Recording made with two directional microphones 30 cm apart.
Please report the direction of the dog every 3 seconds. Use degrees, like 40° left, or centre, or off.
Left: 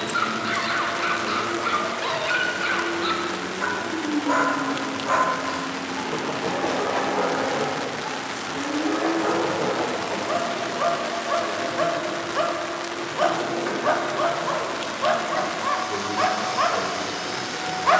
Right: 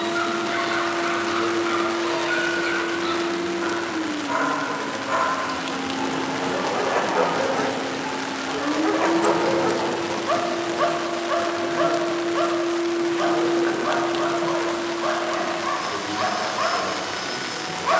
30° left, 30° left, 30° right, 20° right, 20° left, 20° left.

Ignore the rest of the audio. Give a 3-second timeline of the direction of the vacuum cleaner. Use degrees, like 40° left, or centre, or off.
20° left, centre, 40° right, 10° right, 10° left, 10° left.